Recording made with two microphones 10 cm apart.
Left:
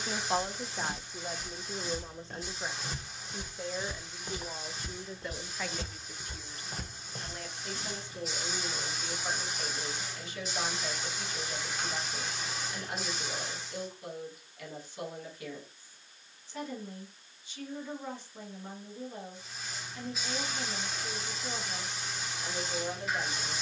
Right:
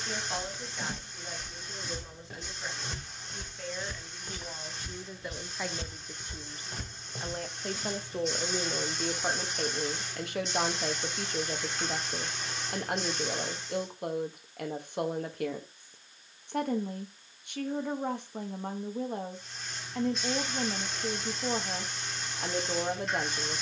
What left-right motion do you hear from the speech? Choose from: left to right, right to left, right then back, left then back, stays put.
left to right.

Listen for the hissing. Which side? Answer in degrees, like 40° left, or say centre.
centre.